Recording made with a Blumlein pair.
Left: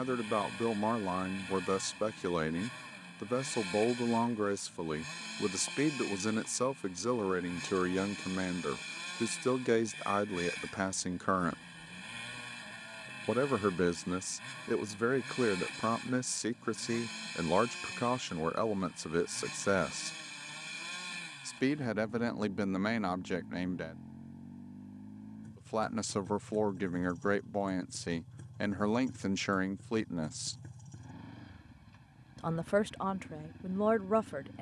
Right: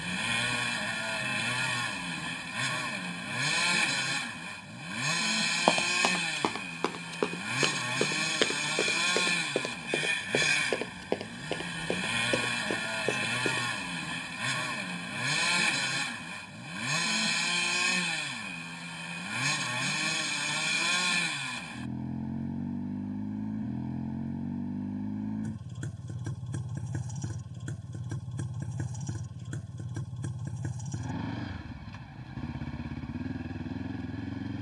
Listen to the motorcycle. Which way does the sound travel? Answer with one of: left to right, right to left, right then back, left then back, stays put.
stays put.